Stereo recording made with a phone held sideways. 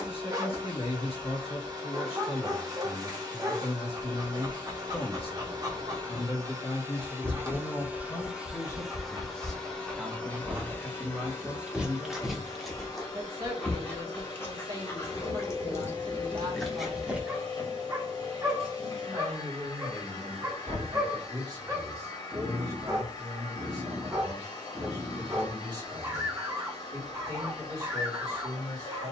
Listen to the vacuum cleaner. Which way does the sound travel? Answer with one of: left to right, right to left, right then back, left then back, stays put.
right to left.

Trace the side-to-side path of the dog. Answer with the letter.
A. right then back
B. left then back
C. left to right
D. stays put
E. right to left
B.